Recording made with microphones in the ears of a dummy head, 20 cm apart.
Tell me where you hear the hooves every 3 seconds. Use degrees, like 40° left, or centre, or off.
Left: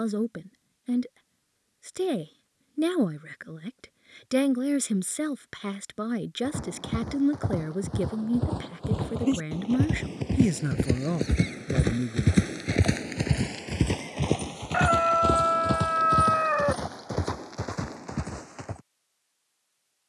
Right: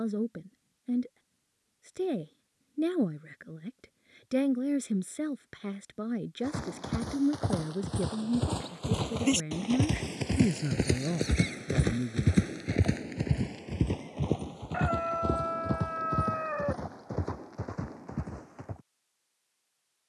off, off, 70° right, 30° right, 40° left, 70° left, 70° left.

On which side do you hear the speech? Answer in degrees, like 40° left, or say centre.
30° left.